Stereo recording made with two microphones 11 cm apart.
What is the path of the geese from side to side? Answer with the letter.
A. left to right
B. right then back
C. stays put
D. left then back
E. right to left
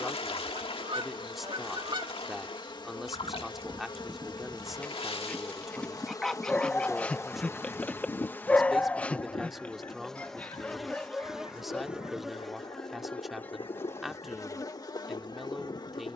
E.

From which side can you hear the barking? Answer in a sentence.
You can hear the barking in the centre.